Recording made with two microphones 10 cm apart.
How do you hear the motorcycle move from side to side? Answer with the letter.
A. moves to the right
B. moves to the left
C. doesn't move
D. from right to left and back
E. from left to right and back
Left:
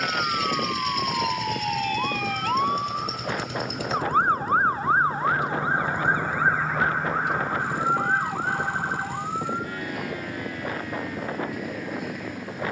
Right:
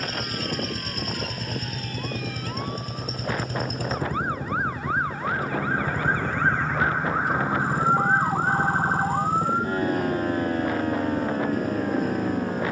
C.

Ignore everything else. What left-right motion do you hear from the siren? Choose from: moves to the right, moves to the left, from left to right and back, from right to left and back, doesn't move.
moves to the right.